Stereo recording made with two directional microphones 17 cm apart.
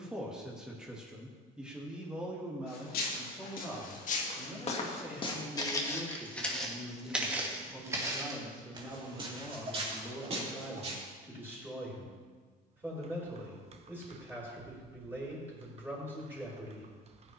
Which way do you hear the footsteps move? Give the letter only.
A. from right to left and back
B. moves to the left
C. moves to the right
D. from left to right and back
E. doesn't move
C.